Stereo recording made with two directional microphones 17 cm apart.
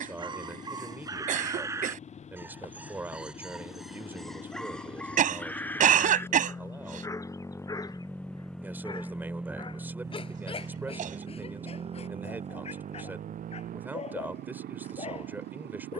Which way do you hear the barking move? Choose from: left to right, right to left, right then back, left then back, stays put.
right to left.